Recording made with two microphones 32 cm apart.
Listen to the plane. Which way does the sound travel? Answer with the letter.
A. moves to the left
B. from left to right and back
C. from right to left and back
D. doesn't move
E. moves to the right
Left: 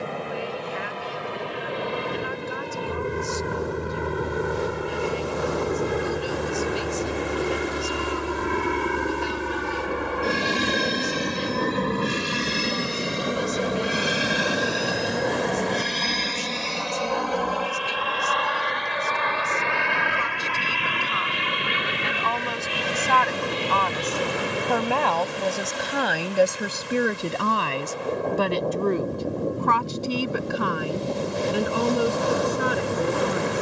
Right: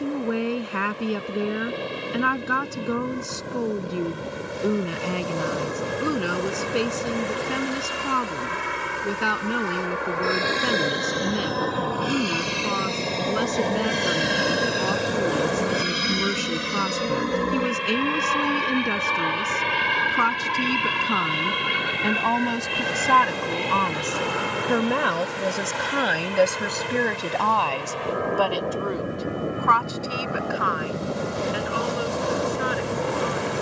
E.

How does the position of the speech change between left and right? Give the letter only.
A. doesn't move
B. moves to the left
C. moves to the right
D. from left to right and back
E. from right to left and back
B.